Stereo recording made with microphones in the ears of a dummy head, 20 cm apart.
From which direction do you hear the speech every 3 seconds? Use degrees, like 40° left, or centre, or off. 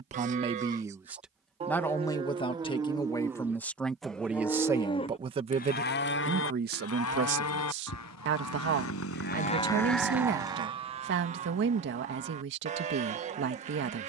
centre, 10° right, 50° right, 50° right, 50° right.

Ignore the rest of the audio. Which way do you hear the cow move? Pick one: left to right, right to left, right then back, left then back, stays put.
left then back.